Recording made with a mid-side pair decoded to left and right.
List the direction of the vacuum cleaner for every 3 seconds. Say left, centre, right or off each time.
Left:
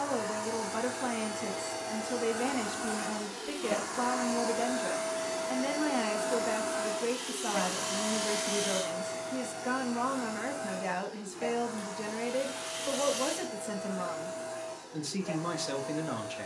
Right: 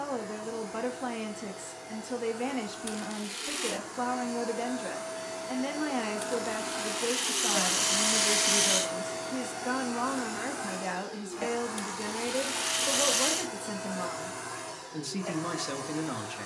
left, left, centre, right, right, right.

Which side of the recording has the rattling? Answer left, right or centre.
right.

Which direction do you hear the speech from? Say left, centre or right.
centre.